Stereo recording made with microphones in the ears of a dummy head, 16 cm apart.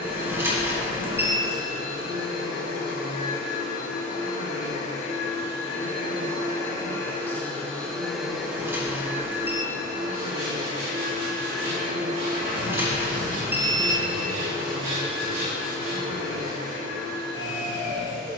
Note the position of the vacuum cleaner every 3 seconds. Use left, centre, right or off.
left, left, centre, right, right, right.